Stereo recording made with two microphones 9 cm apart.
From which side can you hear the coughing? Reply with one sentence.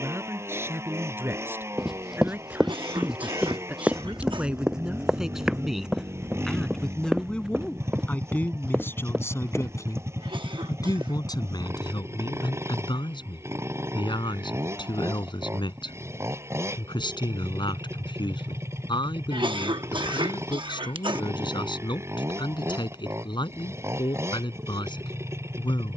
In this clip you hear the coughing on the right.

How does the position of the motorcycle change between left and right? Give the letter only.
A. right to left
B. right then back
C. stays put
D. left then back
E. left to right
C.